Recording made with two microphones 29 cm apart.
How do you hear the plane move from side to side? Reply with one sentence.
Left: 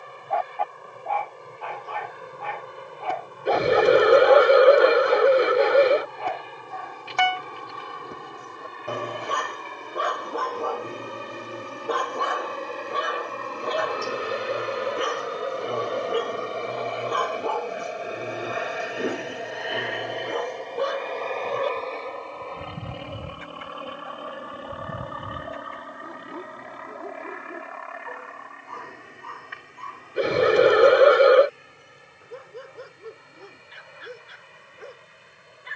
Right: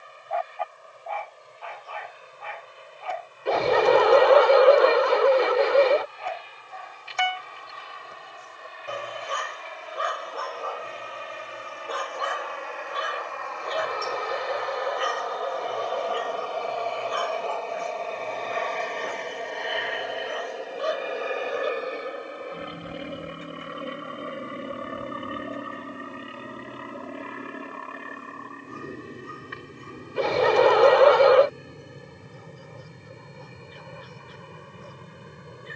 In this clip you hear the plane move from left to right.